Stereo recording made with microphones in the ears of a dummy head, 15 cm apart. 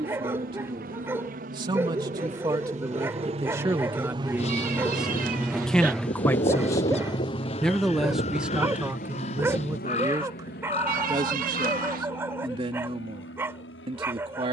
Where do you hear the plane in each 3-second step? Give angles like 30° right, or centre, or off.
50° right, 20° right, 30° left, 60° left, 70° left.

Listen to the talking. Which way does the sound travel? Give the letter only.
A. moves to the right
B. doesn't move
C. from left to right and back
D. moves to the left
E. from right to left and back
E.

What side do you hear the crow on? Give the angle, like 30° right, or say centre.
40° left.